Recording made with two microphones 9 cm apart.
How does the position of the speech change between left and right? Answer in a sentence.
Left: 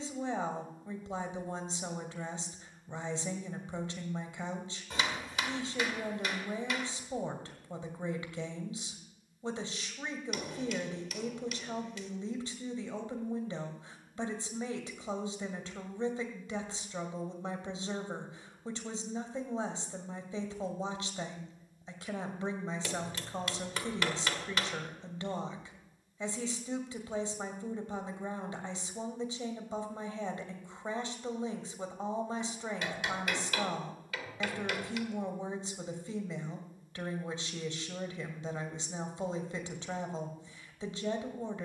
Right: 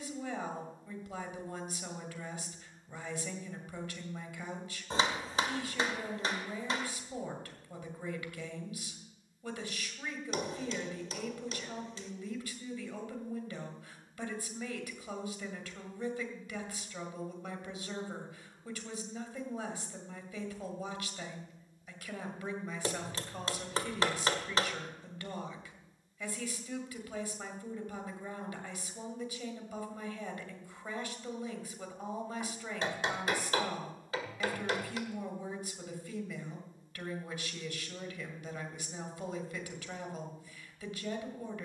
In this clip you hear the speech stay in one place.